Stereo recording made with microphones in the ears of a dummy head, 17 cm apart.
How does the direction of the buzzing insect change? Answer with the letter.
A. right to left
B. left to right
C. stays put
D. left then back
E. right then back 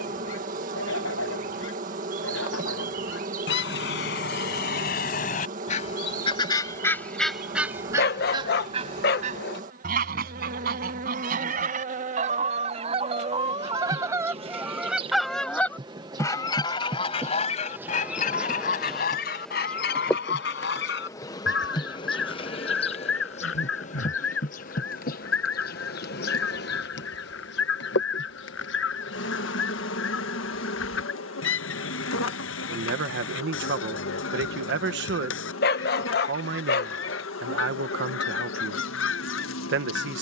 A.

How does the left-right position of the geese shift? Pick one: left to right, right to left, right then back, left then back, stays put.
right then back.